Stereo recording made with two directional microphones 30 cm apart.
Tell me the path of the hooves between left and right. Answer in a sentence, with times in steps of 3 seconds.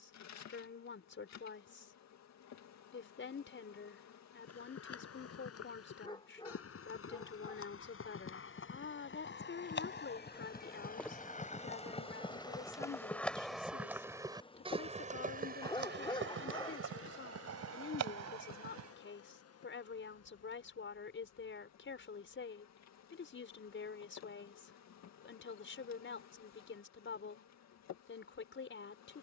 You can hear the hooves not at all from 0 s, on the left from 3 s, in the centre from 12 s, on the right from 15 s and not at all from 21 s.